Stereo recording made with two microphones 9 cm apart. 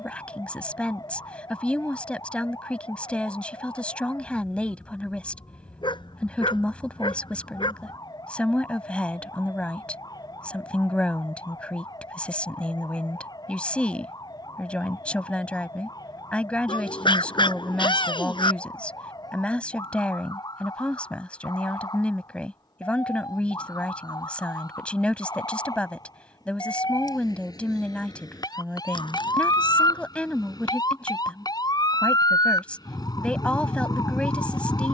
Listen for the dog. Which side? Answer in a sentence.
You can hear the dog on the left.